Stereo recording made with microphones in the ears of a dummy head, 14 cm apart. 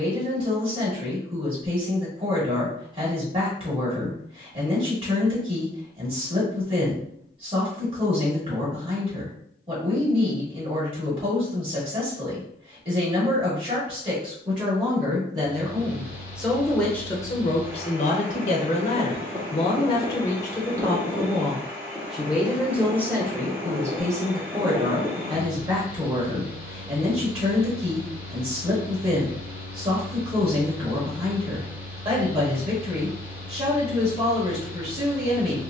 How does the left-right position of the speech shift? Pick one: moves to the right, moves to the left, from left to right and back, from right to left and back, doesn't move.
from right to left and back.